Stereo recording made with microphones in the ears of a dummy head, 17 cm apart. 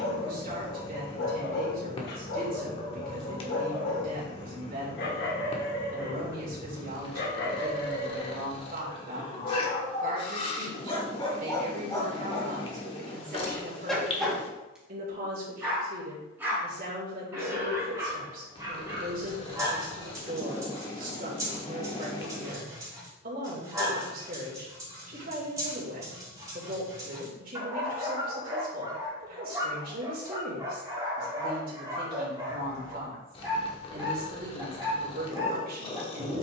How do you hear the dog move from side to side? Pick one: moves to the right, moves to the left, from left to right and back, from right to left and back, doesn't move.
moves to the right.